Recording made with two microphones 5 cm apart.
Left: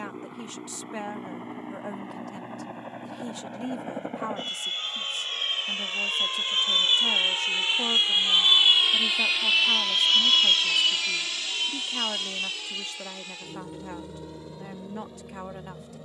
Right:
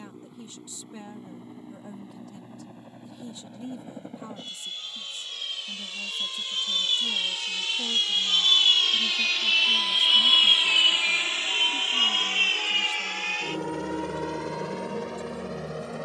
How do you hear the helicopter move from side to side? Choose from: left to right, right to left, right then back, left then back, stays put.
left to right.